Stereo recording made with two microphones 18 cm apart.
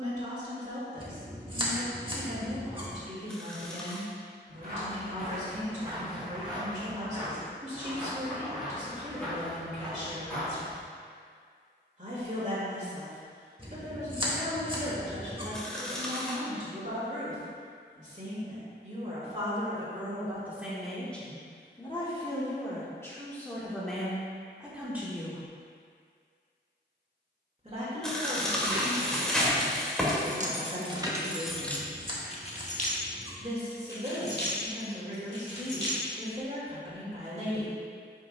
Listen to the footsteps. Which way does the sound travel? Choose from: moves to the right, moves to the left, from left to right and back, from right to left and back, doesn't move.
moves to the left.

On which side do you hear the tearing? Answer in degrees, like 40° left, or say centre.
centre.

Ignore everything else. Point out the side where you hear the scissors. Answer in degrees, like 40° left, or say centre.
30° right.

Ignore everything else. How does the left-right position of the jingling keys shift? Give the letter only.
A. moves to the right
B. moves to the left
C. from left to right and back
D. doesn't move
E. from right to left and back
B.